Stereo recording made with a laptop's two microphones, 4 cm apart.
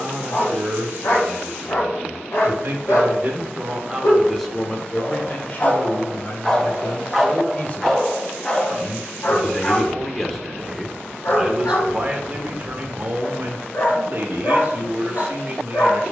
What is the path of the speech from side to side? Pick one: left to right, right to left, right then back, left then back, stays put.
left then back.